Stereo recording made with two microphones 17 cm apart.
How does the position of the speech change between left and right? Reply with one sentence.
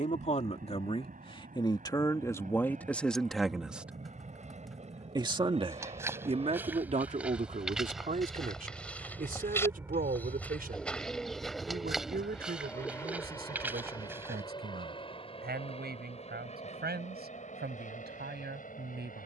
You can hear the speech go from the left side to the right.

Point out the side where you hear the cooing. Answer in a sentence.
You can hear the cooing in the centre.